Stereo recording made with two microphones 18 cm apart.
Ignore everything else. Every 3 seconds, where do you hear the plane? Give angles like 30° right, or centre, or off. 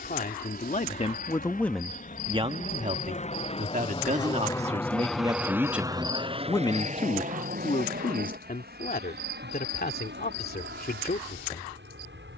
60° left, 20° left, 50° right, 70° right.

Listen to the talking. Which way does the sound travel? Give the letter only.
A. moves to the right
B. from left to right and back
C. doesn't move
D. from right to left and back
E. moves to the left
B.